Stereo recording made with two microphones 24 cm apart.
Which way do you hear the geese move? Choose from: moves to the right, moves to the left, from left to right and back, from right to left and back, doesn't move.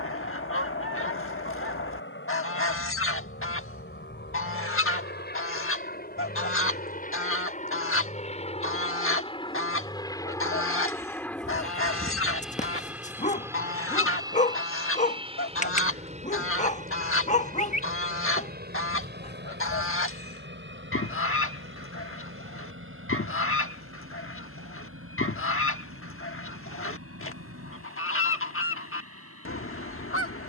doesn't move.